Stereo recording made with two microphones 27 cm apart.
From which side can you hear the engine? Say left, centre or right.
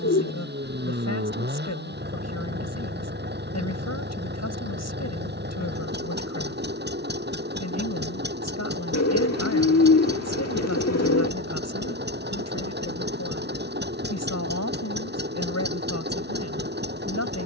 right.